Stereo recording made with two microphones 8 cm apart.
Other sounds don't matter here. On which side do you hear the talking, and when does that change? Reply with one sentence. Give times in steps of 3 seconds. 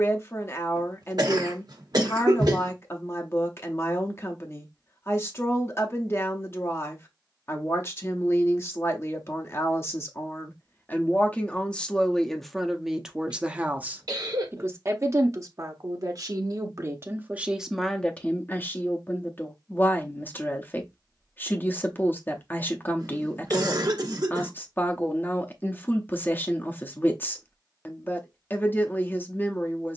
You can hear the talking on the left from 0 s, in the centre from 12 s, on the right from 15 s and on the left from 18 s.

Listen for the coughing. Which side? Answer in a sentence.
In this clip you hear the coughing on the right.